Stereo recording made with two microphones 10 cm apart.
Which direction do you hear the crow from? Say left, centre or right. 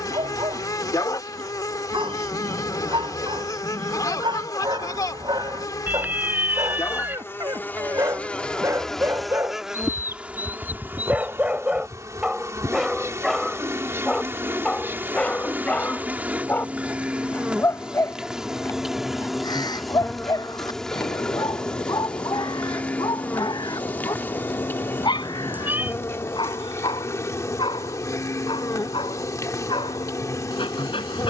left.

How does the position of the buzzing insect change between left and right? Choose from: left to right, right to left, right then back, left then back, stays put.
right then back.